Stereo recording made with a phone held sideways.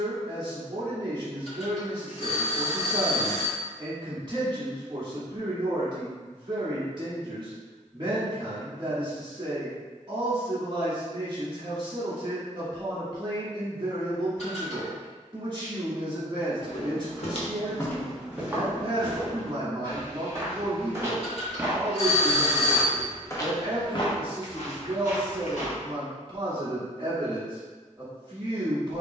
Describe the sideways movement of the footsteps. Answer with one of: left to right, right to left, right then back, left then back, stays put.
right then back.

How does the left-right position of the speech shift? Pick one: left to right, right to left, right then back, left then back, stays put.
stays put.